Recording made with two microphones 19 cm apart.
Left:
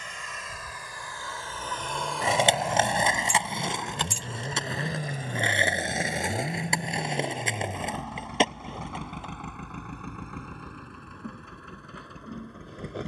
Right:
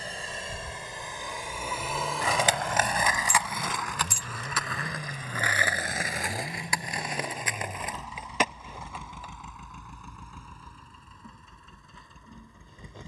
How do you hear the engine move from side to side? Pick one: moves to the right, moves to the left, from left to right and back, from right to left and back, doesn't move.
moves to the left.